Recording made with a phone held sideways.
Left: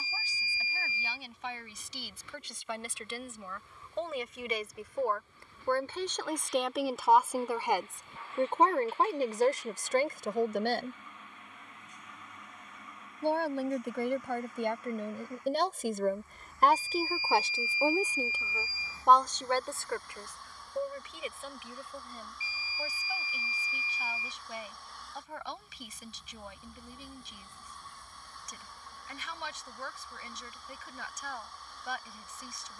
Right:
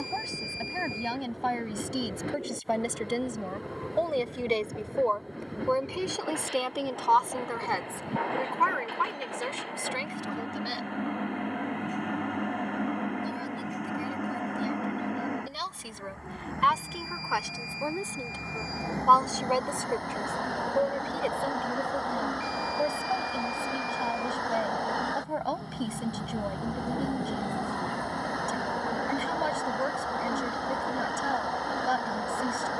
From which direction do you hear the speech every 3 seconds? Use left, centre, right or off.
right, right, centre, left, left, left, centre, right, right, right, right.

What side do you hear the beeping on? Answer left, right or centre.
centre.